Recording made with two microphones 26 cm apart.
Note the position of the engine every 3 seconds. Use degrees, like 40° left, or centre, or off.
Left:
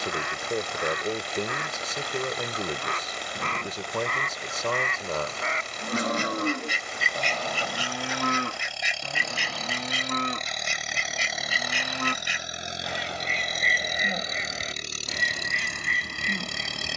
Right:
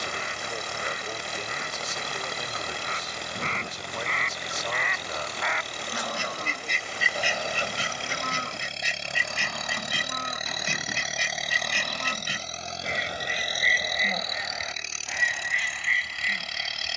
50° right, 40° right, 30° right, 10° right, 30° left, 50° left.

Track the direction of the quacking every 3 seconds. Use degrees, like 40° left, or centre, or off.
70° left, 50° left, 10° right, 60° right, 10° right, 50° left.